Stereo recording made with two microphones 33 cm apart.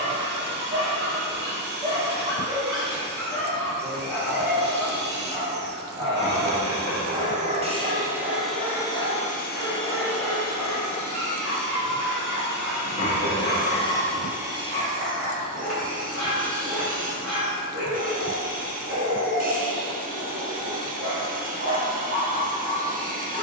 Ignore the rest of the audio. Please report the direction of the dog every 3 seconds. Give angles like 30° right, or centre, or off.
30° right, centre, 20° right, 40° right, 40° right, 40° right, 40° right, 40° right.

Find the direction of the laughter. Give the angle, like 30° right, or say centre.
30° left.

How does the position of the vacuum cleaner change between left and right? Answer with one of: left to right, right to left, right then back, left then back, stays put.
left then back.